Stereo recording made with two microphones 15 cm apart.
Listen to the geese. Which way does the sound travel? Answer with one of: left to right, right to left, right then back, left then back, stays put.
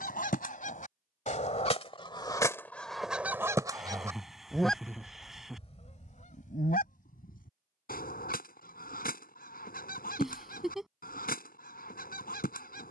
right then back.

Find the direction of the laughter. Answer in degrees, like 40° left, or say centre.
centre.